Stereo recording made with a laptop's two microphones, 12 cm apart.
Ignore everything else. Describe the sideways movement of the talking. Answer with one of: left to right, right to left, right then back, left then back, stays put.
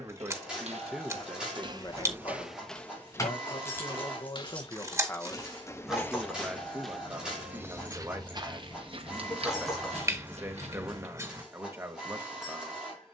left then back.